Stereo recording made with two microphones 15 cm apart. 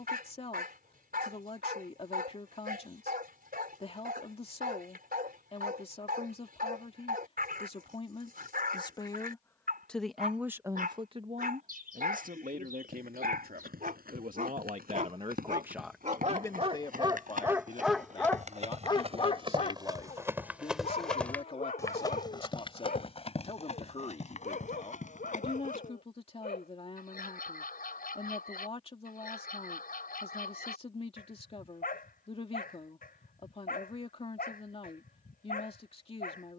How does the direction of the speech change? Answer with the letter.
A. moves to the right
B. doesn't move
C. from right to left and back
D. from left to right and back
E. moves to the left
D.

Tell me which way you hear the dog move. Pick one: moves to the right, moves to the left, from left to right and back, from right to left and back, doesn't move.
moves to the left.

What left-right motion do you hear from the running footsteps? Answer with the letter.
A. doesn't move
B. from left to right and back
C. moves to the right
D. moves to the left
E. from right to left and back
D.